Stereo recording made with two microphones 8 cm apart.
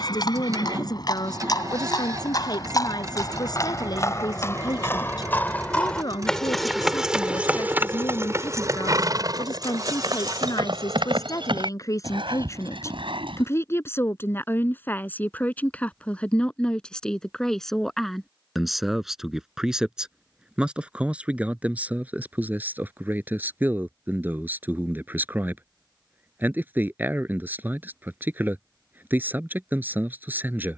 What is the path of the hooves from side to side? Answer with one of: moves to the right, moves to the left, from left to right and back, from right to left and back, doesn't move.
moves to the right.